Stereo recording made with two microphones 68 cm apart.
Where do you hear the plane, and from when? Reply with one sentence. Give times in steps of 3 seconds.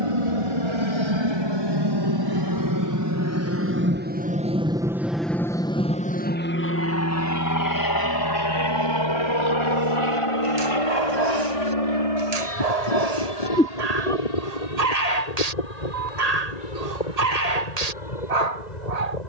You can hear the plane on the right from 0 s, in the centre from 3 s and on the left from 6 s.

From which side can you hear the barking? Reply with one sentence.
You can hear the barking on the right.